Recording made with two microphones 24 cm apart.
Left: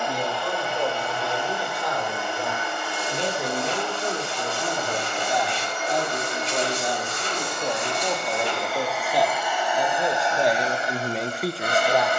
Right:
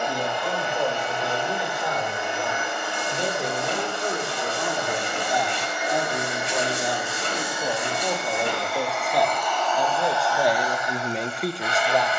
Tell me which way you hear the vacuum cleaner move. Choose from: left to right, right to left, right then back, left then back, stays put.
right to left.